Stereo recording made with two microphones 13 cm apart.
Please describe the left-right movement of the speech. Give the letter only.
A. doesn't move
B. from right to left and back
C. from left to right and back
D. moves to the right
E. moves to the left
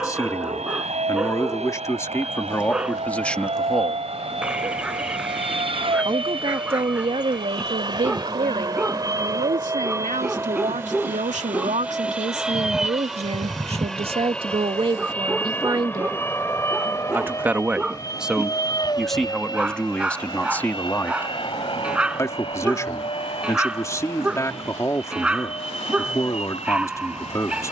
C.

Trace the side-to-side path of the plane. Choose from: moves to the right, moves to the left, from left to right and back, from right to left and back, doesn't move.
moves to the left.